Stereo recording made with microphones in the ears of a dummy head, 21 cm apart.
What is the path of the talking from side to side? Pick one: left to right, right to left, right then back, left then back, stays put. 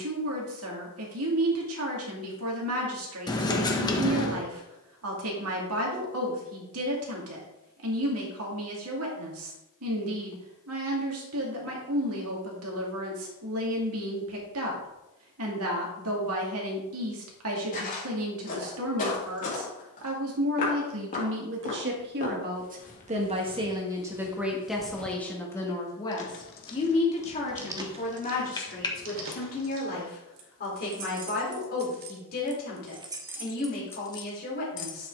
right to left.